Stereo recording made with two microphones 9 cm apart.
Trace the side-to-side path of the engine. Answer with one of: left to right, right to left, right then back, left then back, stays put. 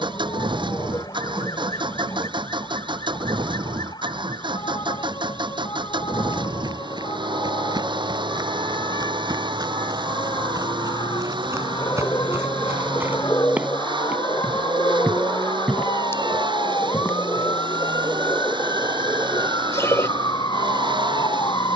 stays put.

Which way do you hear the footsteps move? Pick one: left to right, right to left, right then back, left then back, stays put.
right to left.